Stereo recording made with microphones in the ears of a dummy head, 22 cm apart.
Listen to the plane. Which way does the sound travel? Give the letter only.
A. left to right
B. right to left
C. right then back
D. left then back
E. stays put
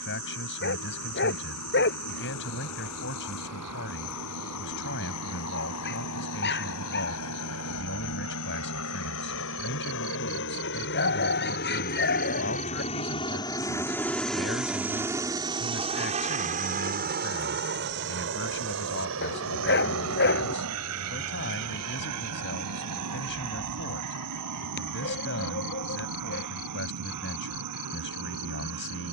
A.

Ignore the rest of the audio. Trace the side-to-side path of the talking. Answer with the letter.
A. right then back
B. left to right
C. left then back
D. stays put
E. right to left
D.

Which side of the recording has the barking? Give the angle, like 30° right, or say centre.
50° left.